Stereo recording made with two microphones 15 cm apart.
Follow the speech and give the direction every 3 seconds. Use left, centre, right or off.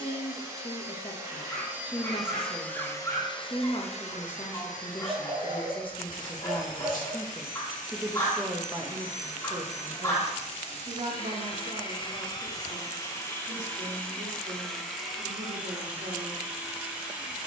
left, left, centre, right, right, right.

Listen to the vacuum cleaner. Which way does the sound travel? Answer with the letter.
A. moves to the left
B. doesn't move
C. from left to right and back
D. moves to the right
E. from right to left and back
E.